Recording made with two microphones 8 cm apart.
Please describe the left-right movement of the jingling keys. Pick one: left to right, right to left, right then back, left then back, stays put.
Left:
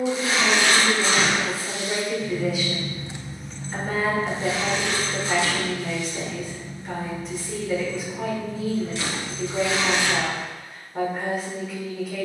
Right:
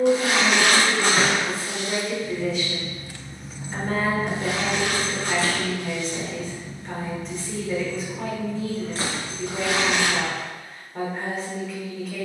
left to right.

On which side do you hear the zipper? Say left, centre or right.
right.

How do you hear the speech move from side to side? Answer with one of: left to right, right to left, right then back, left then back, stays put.
stays put.